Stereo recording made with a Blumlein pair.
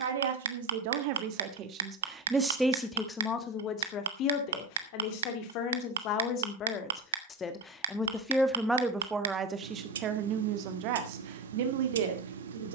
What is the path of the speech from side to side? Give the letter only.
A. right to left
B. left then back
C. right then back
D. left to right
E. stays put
B.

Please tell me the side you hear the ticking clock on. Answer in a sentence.
In this clip you hear the ticking clock on the right.